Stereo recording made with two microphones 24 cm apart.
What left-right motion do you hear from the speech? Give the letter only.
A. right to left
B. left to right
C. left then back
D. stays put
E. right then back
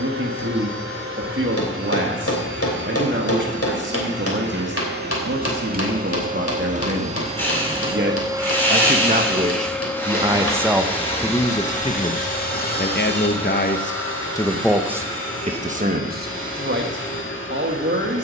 C.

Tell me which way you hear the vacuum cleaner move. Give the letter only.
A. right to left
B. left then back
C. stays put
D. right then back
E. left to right
A.